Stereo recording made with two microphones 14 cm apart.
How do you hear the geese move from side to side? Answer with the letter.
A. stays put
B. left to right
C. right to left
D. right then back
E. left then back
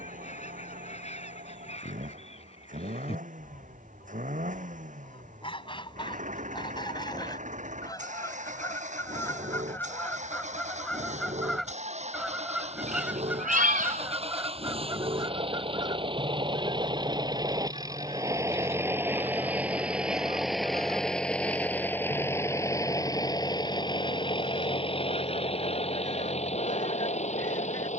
B.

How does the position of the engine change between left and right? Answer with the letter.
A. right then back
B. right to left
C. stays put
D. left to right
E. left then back
B.